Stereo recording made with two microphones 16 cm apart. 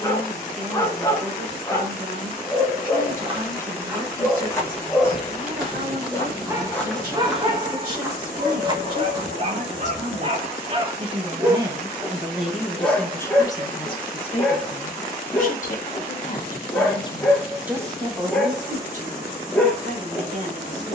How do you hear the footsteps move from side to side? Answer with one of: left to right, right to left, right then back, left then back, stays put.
left then back.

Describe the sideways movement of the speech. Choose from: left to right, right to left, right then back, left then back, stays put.
left then back.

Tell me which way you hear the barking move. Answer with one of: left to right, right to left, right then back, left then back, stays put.
right then back.